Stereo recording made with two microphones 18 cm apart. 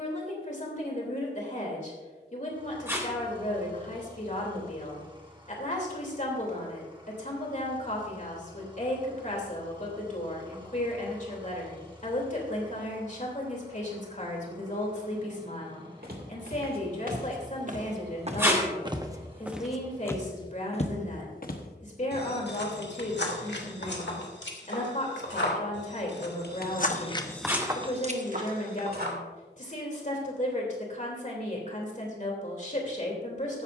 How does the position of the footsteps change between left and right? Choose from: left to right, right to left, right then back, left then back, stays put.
left then back.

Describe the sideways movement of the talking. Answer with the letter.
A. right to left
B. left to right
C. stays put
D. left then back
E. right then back
C.